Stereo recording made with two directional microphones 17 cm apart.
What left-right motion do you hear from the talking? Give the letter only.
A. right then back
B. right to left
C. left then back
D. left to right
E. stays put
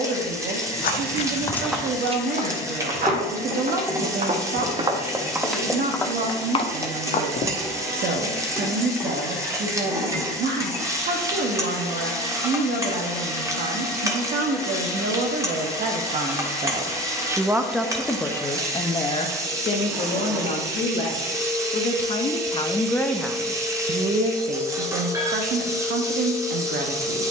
C.